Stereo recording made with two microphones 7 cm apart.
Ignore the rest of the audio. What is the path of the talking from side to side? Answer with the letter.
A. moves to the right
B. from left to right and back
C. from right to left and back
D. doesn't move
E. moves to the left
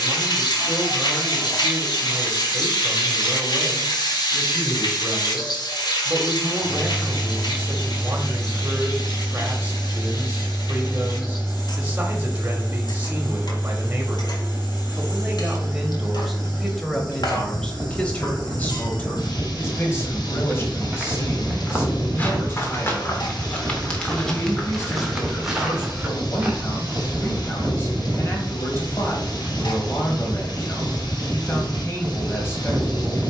E.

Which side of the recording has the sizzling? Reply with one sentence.
You can hear the sizzling on the left.